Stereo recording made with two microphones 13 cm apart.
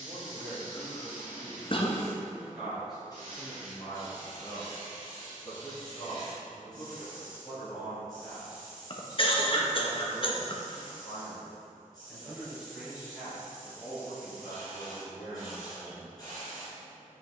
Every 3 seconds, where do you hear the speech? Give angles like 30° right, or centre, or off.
10° right, 10° left, 20° left, 10° left, 10° right, 20° right.